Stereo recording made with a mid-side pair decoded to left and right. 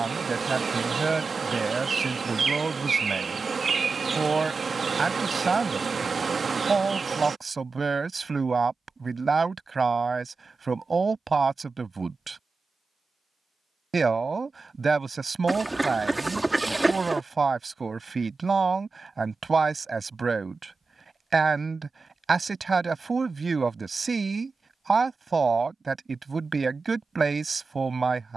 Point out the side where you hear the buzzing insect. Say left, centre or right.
right.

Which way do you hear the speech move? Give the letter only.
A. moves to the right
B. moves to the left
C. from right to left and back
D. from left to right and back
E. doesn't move
E.